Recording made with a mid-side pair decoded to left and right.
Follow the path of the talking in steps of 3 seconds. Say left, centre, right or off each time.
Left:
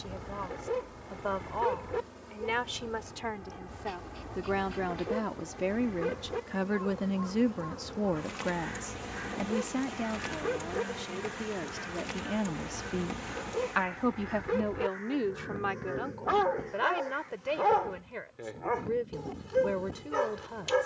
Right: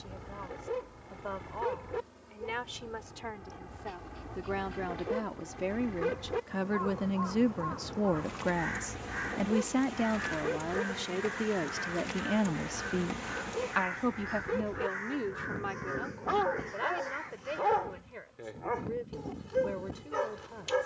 left, left, centre, right, centre, left, left.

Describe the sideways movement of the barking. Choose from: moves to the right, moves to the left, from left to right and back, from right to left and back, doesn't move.
from left to right and back.